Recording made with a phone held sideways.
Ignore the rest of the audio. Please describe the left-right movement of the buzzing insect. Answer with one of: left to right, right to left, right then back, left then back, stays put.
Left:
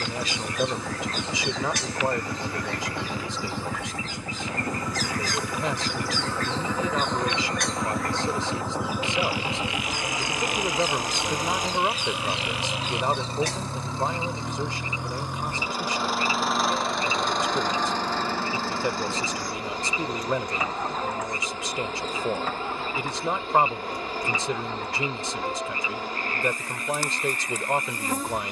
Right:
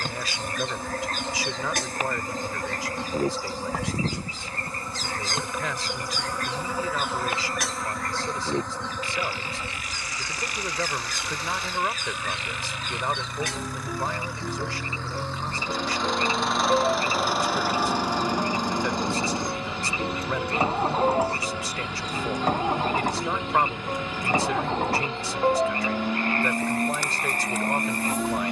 right to left.